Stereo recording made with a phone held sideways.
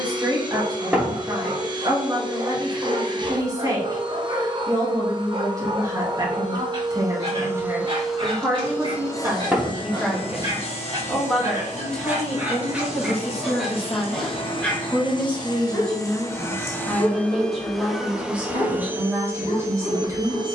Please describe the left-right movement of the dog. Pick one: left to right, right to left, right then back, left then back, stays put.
right to left.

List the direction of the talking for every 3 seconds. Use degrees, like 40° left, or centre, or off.
30° right, 30° right, 20° right, centre, 10° left, centre, 20° right.